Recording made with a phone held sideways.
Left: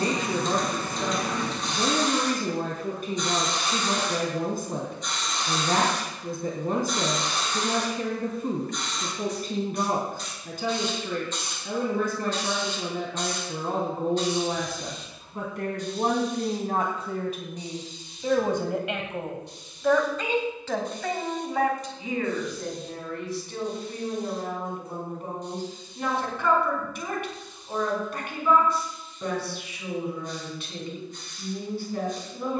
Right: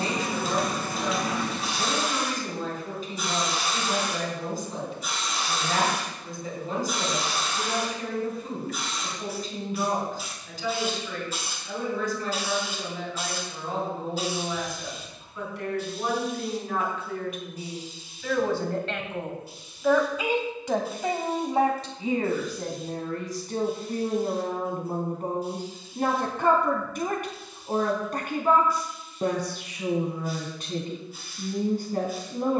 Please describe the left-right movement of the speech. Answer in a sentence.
You can hear the speech move to the right.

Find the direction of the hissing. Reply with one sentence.
You can hear the hissing in the centre.